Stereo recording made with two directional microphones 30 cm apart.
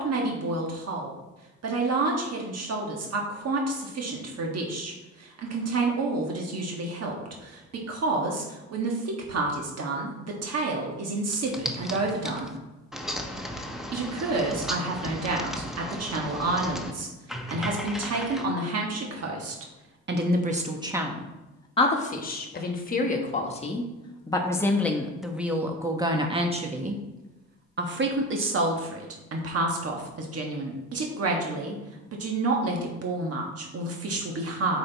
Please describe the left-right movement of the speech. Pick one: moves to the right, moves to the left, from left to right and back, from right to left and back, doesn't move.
from right to left and back.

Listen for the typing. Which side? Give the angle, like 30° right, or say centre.
centre.